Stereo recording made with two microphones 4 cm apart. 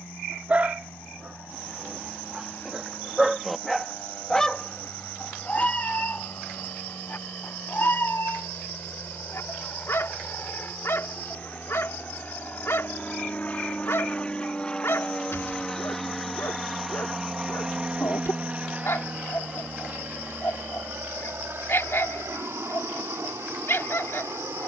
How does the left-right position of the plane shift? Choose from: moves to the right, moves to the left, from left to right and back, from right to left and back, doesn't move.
moves to the right.